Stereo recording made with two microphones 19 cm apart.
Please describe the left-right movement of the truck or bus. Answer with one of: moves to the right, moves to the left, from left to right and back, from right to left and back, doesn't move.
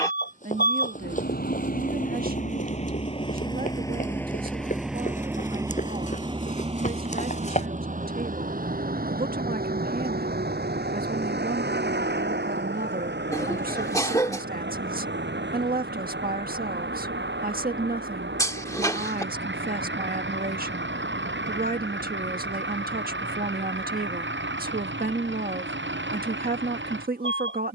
moves to the right.